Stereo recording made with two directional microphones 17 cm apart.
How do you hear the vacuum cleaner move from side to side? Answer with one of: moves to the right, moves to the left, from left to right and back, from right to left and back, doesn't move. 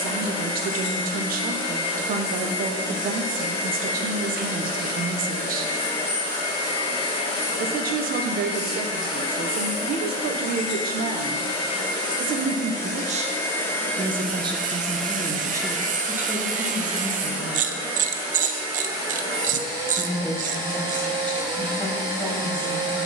moves to the right.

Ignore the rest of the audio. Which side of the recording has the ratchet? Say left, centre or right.
right.